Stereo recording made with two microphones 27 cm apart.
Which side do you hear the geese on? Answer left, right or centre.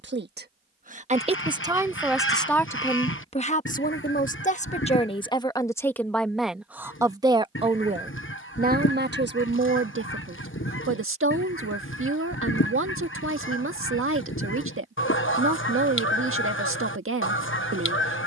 left.